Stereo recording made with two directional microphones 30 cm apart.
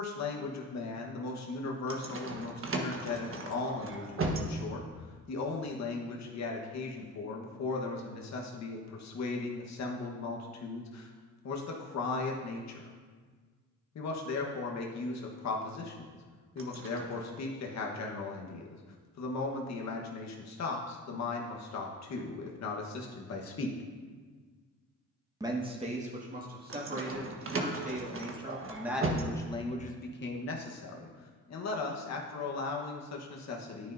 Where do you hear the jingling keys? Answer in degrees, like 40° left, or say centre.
40° right.